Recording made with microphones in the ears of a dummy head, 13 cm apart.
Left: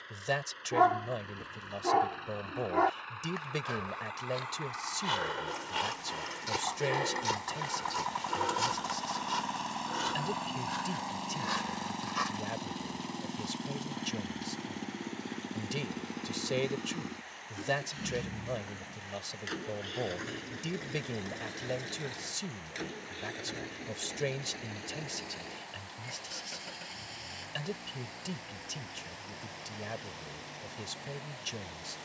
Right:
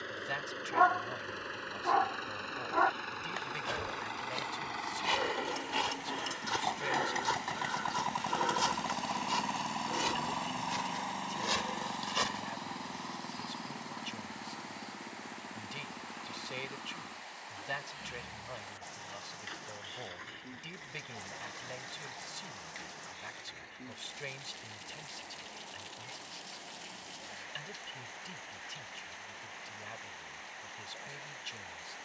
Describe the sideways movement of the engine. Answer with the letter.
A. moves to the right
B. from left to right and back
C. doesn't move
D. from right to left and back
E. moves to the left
E.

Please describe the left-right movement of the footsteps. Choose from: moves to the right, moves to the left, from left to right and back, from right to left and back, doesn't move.
from right to left and back.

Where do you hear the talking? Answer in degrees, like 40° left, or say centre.
50° left.